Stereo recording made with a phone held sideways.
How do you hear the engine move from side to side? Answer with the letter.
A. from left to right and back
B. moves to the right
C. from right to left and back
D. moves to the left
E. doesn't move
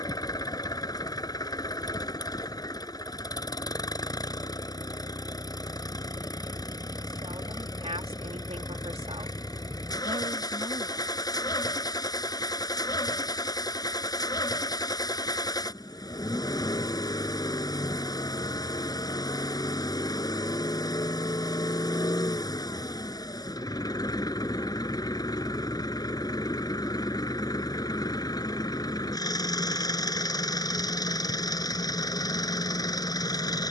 E.